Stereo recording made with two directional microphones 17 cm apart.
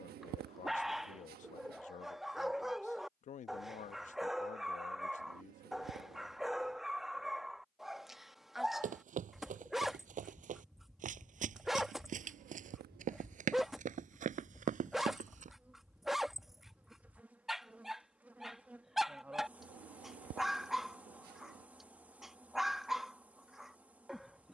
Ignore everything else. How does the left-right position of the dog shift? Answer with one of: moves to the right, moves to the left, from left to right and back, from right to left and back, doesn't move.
doesn't move.